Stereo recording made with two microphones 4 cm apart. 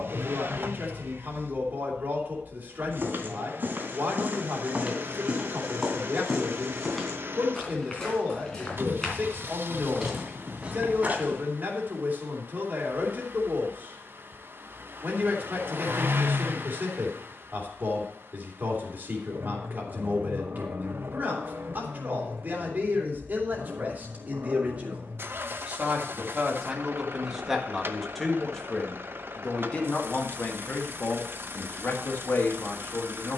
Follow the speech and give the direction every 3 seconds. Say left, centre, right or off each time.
right, right, right, right, right, right, right, right, right, centre, left.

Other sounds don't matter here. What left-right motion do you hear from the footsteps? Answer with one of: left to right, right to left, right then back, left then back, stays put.
left then back.